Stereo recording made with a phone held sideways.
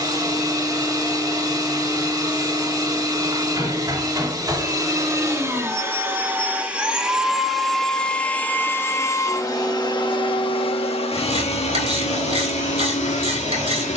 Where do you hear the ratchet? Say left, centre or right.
right.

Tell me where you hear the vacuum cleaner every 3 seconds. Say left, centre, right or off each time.
right, right, centre, left, left.